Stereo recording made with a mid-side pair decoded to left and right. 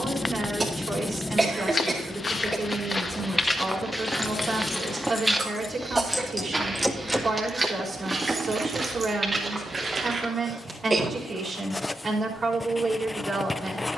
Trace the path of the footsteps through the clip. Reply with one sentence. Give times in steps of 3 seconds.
You can hear the footsteps on the left from 0 s, in the centre from 3 s, on the right from 6 s and not at all from 12 s.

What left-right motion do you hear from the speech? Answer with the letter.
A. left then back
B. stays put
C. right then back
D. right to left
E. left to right
B.